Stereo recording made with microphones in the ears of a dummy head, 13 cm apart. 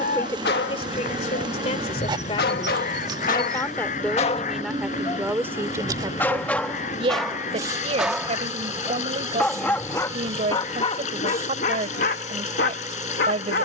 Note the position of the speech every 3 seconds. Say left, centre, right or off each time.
left, centre, right, right, right.